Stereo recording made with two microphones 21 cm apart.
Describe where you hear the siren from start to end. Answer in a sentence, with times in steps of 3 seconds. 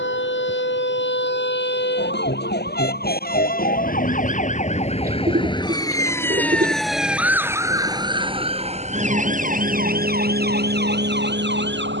You can hear the siren on the left from 0 s, in the centre from 6 s and on the right from 9 s.